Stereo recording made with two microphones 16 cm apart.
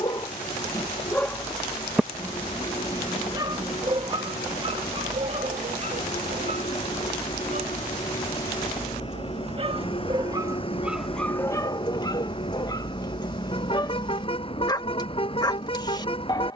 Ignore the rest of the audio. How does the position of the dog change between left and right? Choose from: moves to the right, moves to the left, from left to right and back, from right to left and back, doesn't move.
from left to right and back.